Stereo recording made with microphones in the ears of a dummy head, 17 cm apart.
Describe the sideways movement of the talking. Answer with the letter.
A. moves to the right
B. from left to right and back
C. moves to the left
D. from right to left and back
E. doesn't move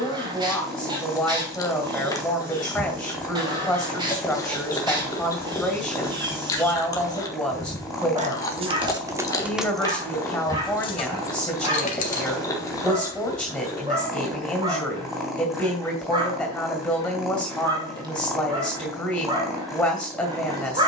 E.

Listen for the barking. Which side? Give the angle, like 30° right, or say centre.
20° right.